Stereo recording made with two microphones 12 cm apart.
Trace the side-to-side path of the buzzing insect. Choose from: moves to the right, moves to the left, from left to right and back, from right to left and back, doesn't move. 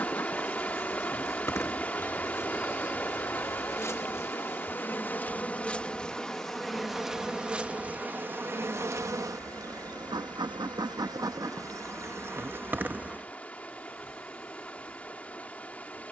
from left to right and back.